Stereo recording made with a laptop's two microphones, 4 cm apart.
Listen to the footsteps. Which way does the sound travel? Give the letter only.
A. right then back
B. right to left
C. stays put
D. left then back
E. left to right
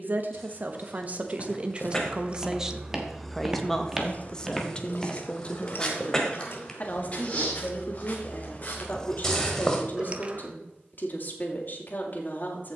A.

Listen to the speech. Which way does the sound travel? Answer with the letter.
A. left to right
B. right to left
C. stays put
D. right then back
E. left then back
B.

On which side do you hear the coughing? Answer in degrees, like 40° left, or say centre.
20° left.